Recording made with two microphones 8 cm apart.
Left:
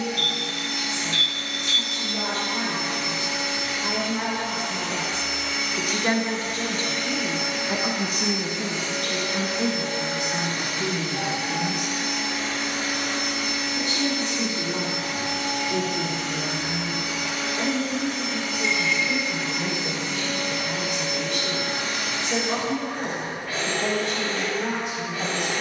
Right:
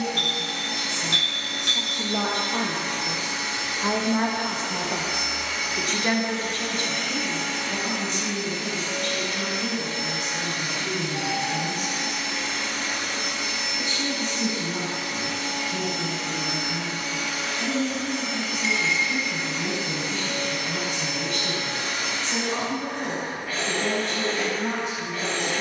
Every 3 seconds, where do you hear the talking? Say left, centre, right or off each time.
right, right, left, left, left, left, left, left, left.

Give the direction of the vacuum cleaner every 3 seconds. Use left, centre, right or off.
right, right, centre, left, left, left, left, left, left.